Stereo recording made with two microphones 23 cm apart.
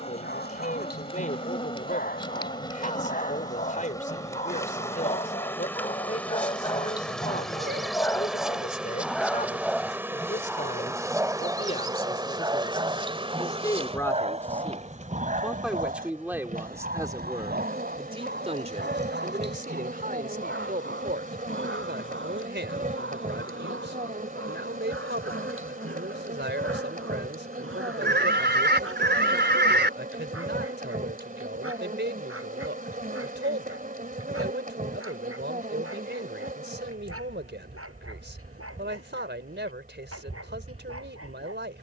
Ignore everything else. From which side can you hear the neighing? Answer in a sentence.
In this clip you hear the neighing on the right.